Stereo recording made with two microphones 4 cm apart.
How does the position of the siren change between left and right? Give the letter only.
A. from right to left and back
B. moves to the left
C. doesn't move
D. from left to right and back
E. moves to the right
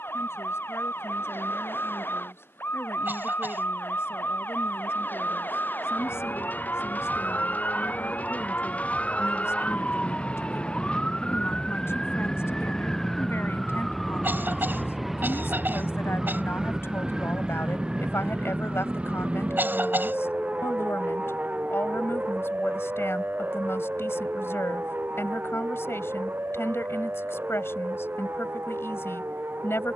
E.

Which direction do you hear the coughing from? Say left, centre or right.
right.